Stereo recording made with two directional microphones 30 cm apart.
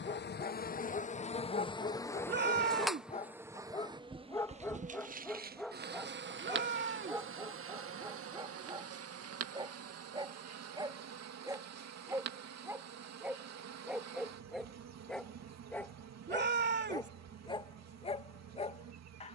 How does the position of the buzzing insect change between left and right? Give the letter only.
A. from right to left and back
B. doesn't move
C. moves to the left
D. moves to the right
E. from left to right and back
D.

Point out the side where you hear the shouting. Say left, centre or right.
right.